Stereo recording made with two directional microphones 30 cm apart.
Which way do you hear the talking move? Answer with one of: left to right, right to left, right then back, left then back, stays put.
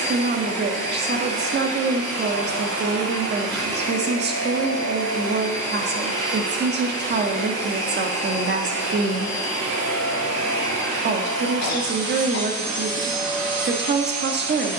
stays put.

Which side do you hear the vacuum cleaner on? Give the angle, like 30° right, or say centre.
60° right.